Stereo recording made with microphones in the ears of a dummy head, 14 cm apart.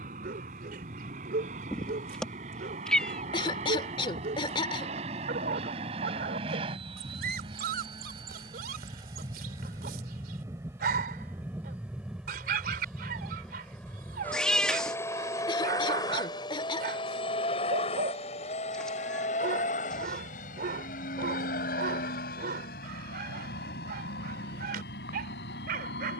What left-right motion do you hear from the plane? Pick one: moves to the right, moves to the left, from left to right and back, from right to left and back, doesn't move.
moves to the left.